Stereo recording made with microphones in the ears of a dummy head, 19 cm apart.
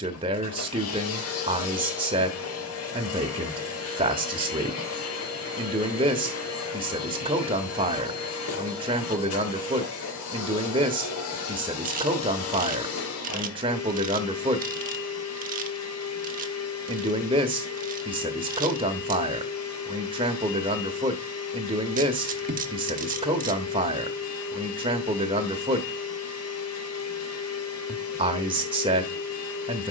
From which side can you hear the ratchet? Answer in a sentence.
In this clip you hear the ratchet on the right.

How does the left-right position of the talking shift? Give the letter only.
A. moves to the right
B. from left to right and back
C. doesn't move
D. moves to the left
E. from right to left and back
C.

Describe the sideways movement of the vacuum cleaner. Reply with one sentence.
You can hear the vacuum cleaner stay in one place.